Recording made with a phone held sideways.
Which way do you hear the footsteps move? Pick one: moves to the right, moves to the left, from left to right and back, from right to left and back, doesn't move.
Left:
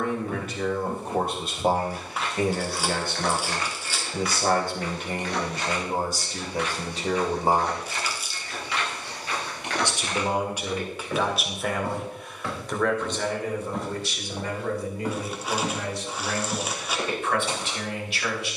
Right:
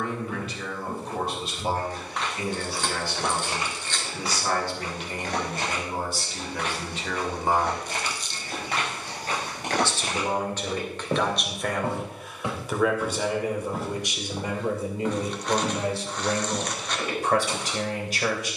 from left to right and back.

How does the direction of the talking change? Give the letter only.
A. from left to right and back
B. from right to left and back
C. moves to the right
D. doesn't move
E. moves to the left
C.